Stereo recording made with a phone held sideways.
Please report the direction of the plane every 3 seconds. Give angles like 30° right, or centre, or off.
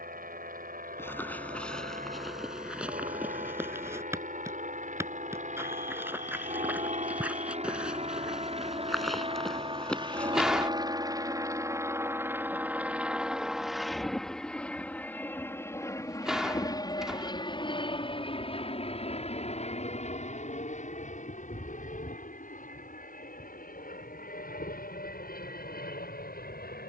60° right, 60° right, 40° right, 30° right, centre, 20° left, 40° left, 50° left, 60° left.